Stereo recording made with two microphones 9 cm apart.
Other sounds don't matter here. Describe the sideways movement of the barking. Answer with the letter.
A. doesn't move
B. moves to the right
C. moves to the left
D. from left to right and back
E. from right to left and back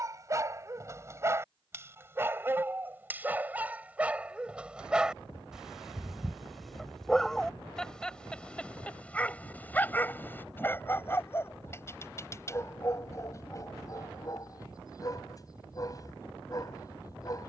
C.